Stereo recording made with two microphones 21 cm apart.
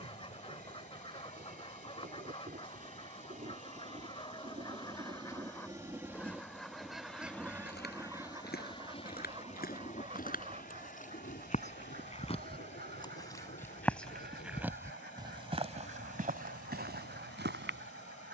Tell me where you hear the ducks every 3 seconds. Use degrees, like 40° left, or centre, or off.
30° left, 20° left, 10° right, 40° right, 50° right, 60° right.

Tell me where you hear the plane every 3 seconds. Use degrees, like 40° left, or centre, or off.
50° right, 30° right, 10° left, 40° left, 60° left, 70° left.